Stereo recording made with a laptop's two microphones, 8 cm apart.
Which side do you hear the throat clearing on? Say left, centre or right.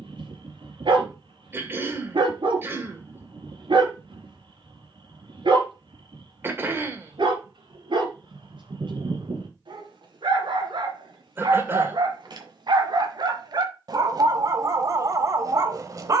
right.